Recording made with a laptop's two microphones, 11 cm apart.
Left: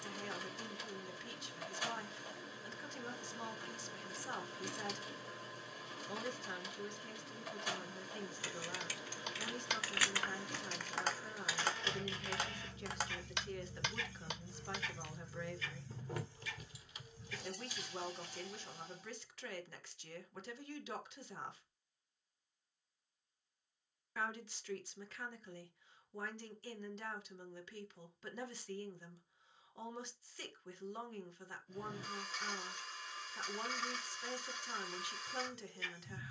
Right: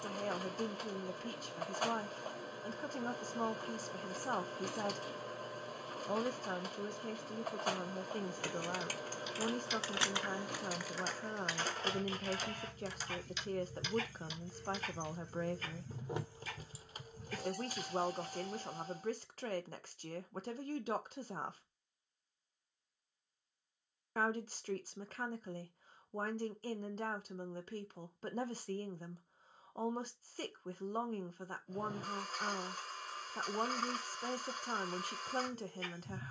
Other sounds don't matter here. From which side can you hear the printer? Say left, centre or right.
right.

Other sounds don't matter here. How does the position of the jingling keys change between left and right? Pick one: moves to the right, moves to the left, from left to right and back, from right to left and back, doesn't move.
from right to left and back.